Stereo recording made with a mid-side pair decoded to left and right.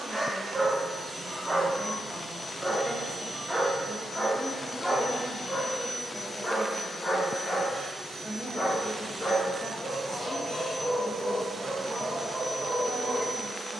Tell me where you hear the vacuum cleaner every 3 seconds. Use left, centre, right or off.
left, left, centre, right, right.